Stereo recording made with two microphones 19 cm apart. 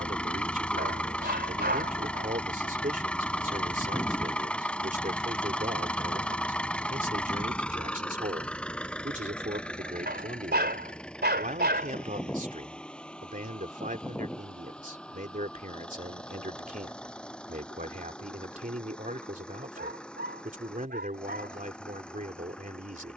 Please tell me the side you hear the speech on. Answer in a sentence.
In this clip you hear the speech on the right.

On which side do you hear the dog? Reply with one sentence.
In this clip you hear the dog on the right.